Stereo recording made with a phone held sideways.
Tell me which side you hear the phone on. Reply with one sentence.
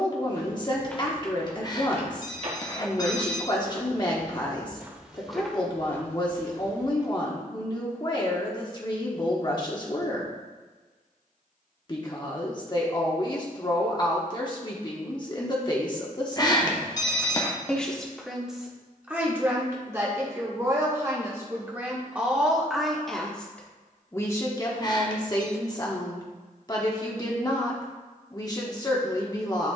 You can hear the phone on the left.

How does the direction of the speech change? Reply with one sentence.
You can hear the speech go right and come back.